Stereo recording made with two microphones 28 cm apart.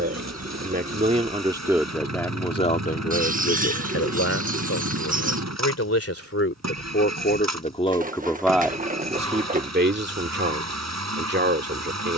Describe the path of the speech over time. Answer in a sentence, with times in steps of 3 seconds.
You can hear the speech in the centre from 0 s, on the left from 3 s and on the right from 9 s.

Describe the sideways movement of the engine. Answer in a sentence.
In this clip you hear the engine stay in one place.